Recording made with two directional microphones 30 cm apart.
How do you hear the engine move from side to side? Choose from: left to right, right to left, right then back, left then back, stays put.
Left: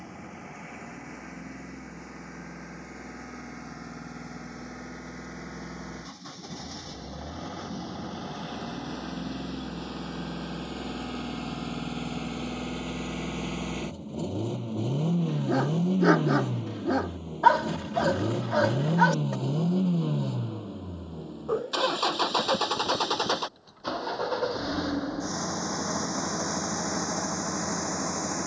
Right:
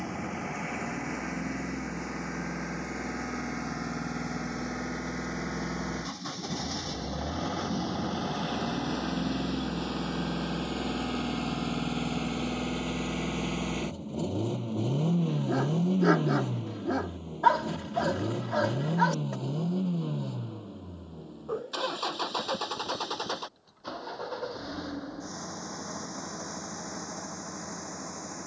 right to left.